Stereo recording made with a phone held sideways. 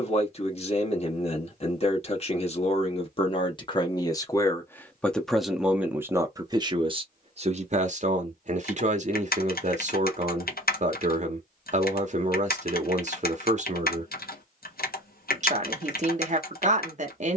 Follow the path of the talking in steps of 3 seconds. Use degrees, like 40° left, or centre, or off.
40° left, 20° left, 40° right, 50° right, 50° right, 50° right.